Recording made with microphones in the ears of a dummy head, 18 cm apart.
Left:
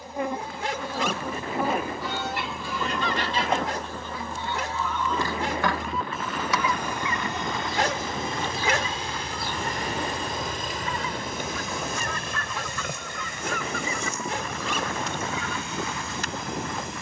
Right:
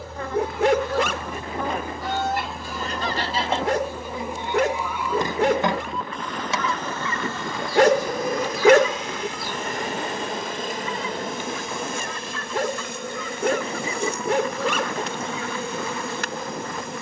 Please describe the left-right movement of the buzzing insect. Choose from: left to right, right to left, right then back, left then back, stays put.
left to right.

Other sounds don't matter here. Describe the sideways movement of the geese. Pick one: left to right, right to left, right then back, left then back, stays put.
right to left.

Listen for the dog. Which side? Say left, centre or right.
right.